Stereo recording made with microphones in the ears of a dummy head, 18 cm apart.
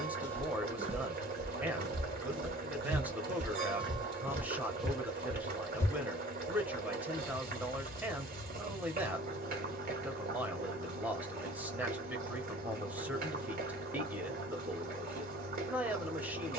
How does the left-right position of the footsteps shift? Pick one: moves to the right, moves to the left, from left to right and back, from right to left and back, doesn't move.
from left to right and back.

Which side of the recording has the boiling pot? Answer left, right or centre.
right.